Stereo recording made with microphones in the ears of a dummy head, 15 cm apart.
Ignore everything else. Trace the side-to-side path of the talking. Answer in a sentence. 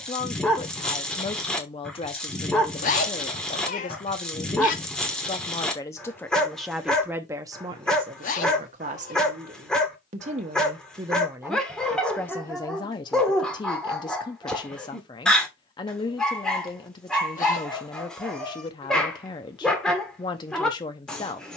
You can hear the talking go right and come back.